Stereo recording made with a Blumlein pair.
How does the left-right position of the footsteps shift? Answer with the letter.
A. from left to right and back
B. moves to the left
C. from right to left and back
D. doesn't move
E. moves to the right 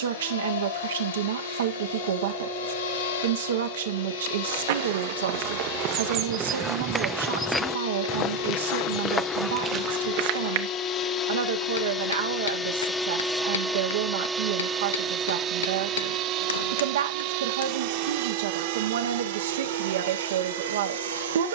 C.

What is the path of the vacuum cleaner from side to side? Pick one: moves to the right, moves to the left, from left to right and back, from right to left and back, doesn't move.
moves to the right.